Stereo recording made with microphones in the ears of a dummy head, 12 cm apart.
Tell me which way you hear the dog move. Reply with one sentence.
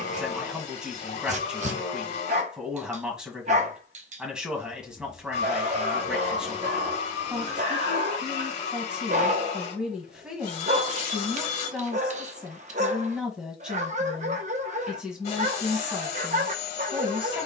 In this clip you hear the dog stay in one place.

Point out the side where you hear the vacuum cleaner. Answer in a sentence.
You can hear the vacuum cleaner on the left.